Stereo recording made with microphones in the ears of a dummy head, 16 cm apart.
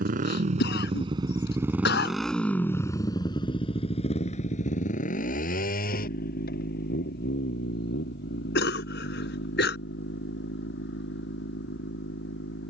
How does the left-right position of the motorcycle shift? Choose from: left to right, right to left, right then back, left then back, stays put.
right to left.